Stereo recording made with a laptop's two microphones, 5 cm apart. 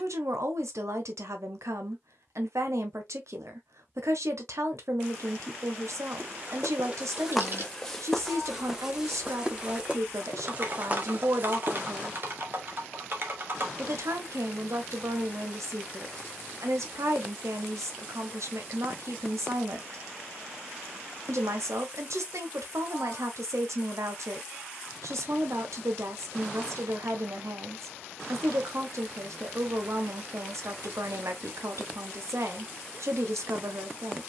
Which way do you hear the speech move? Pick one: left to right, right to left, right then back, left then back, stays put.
stays put.